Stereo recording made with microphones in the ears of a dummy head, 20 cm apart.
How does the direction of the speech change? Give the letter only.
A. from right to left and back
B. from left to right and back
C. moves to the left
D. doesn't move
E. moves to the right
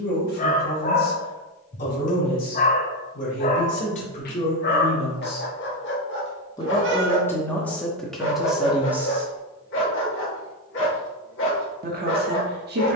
E.